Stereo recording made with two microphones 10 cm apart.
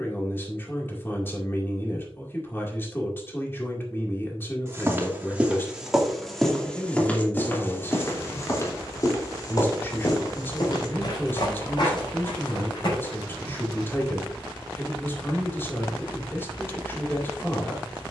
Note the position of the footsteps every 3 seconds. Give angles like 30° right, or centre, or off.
off, 20° right, 20° left, 50° left, 60° left, off.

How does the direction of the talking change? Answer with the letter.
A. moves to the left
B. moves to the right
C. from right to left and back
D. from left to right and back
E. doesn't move
E.